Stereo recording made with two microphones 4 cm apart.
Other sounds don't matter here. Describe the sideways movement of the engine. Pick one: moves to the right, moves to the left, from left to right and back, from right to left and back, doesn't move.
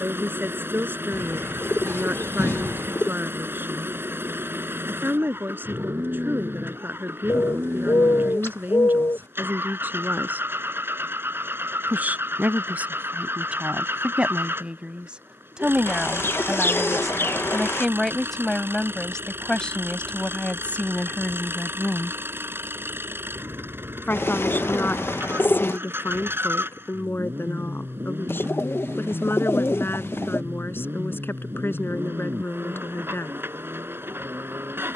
doesn't move.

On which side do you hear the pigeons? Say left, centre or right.
left.